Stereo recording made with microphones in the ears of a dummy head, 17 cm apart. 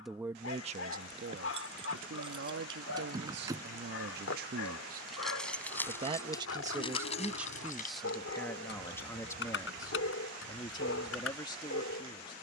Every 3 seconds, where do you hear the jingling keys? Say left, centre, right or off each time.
right, centre, left, left.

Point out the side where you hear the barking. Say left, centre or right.
left.